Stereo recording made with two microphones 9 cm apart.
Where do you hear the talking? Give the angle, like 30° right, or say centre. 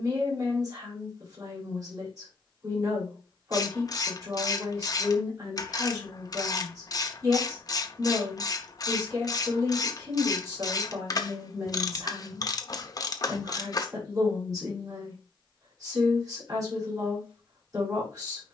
40° right.